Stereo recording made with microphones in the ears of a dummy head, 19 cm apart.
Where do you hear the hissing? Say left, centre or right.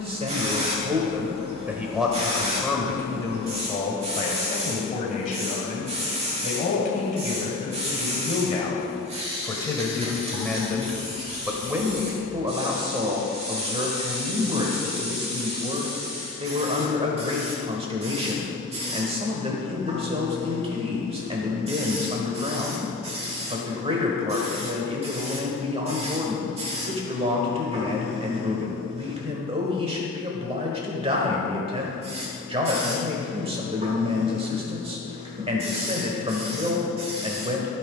right.